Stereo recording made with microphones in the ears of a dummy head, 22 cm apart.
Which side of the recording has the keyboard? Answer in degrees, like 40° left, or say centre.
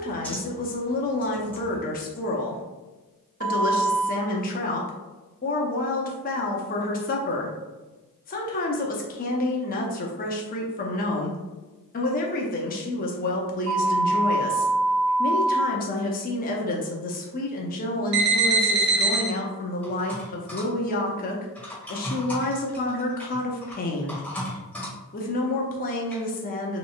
10° left.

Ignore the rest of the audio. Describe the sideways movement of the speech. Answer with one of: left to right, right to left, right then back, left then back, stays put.
stays put.